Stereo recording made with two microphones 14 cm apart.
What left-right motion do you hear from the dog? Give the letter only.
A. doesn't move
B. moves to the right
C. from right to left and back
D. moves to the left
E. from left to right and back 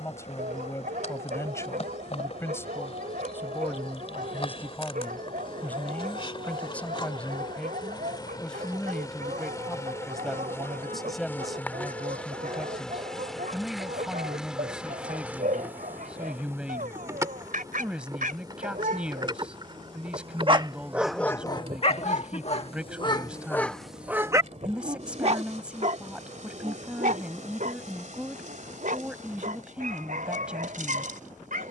C.